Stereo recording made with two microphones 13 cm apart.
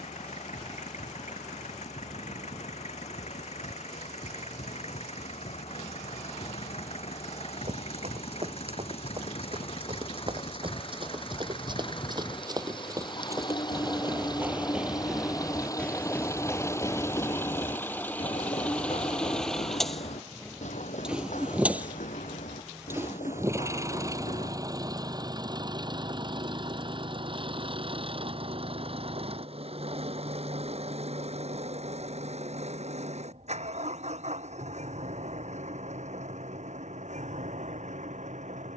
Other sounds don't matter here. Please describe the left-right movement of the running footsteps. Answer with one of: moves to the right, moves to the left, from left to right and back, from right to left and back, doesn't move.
moves to the left.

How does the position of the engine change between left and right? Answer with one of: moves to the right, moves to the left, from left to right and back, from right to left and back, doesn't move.
moves to the right.